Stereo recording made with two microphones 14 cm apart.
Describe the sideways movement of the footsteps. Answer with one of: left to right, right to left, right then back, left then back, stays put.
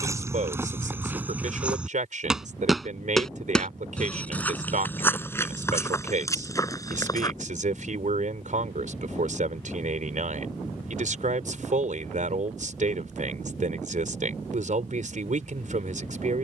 right to left.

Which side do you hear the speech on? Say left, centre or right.
right.